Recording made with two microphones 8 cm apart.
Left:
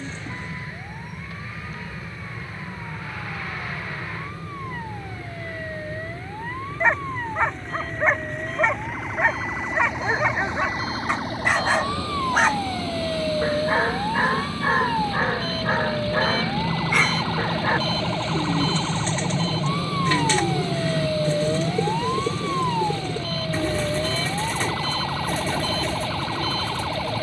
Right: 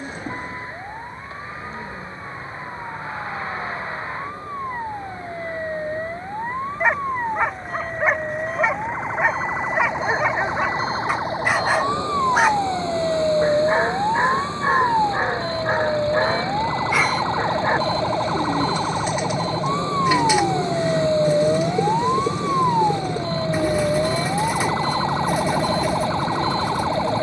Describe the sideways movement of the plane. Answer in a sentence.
You can hear the plane move from left to right.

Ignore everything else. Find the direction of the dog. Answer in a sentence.
You can hear the dog in the centre.